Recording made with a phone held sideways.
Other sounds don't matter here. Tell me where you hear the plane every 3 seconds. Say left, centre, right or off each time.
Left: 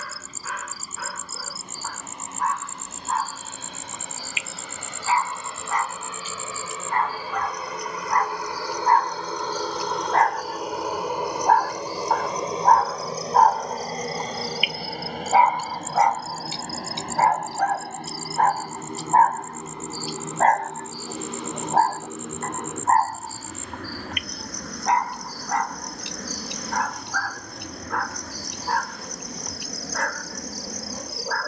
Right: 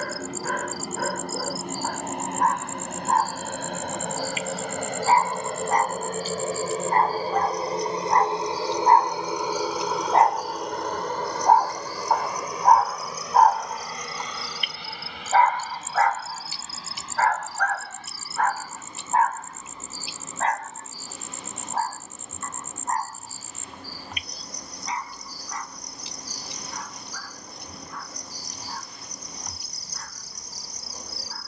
right, right, right, centre, left, left, left, left, left, left, left.